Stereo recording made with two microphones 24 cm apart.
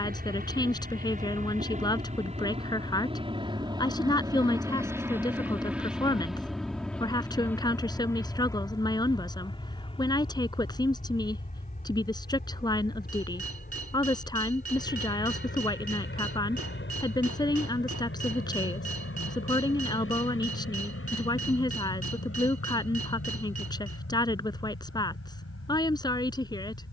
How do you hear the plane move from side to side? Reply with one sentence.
You can hear the plane travel towards the left.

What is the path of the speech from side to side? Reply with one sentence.
In this clip you hear the speech stay in one place.